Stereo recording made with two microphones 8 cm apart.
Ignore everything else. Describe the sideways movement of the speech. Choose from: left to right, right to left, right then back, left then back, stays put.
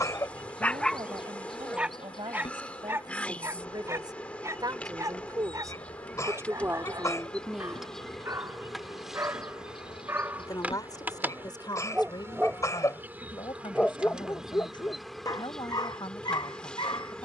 right to left.